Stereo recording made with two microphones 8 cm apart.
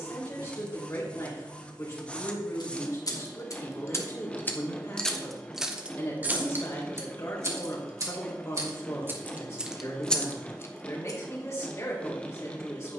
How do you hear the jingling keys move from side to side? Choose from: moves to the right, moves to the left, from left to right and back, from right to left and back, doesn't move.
from left to right and back.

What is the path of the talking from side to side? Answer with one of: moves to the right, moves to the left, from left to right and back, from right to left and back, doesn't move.
doesn't move.